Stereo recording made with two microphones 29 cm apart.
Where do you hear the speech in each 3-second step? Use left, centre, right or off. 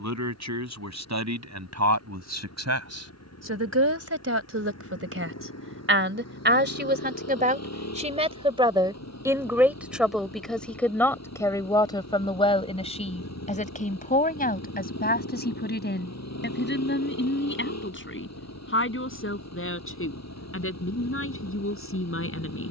right, right, right, centre, left, left, left, left.